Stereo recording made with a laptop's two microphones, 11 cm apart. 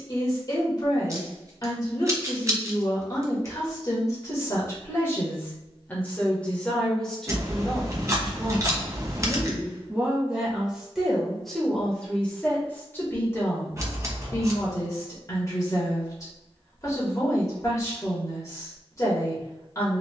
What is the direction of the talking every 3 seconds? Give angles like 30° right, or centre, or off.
40° left, 30° left, centre, 10° right, 20° left, 30° left, 30° left.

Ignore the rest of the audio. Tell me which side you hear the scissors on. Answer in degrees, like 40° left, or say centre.
30° right.